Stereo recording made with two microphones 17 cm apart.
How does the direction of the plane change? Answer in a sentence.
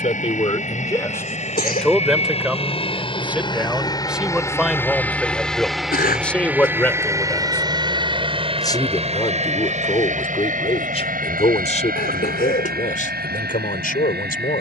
You can hear the plane move to the right.